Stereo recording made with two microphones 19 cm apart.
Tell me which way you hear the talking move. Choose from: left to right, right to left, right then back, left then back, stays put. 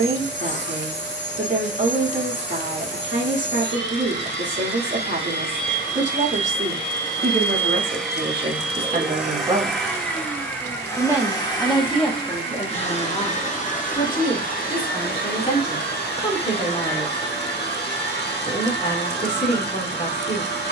right to left.